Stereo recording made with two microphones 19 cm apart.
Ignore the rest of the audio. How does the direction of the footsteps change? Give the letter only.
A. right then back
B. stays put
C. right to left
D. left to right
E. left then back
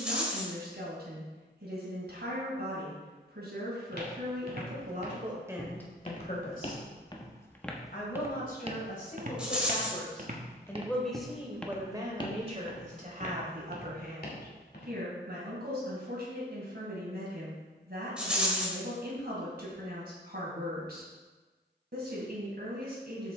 A.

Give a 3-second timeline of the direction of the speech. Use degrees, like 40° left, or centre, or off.
60° right, 40° right, 50° left, 20° left, 50° right, 60° right, 60° right, 60° right.